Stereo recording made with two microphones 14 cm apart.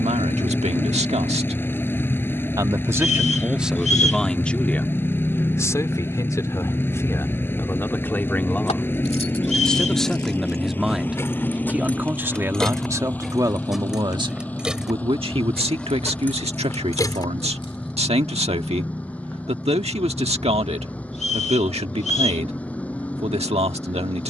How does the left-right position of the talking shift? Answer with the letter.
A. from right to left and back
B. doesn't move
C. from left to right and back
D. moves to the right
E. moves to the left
A.